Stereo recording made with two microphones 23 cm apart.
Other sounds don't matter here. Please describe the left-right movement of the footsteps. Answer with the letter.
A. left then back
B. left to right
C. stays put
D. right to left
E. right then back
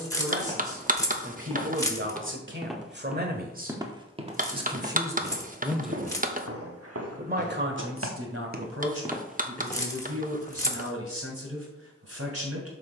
E.